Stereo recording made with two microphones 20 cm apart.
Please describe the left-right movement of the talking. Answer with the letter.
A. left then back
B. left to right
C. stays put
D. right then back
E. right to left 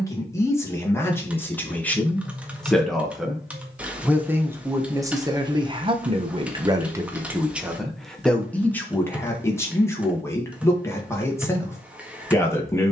D.